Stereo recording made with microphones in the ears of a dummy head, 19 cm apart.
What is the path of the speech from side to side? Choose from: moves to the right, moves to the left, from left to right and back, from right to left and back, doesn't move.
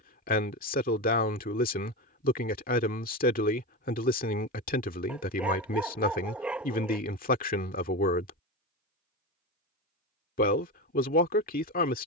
doesn't move.